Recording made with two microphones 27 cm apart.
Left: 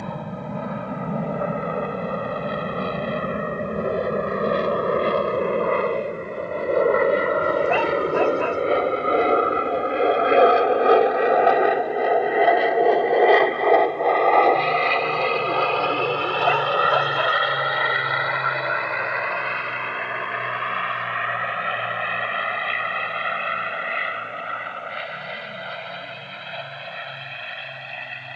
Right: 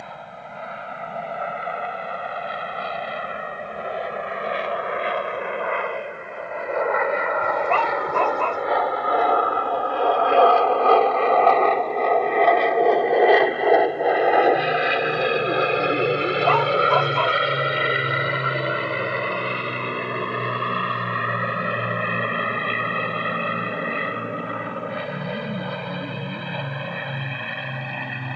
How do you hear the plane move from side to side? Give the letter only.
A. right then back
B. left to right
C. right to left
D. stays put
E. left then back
B.